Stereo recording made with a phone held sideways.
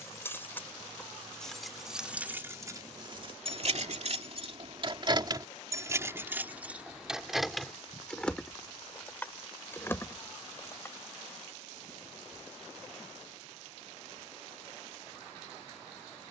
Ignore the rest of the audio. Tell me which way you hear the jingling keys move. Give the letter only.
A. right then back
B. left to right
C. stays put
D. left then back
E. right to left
A.